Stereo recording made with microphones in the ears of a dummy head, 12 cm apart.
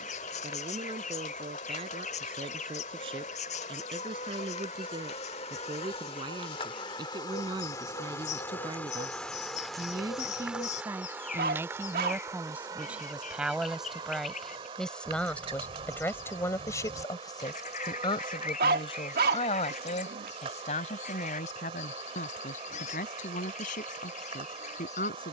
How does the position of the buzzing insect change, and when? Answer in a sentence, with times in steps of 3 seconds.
You can hear the buzzing insect on the left from 0 s, in the centre from 9 s and on the right from 12 s.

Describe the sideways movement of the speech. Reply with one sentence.
You can hear the speech move from right to left.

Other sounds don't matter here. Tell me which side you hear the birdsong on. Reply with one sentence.
You can hear the birdsong on the left.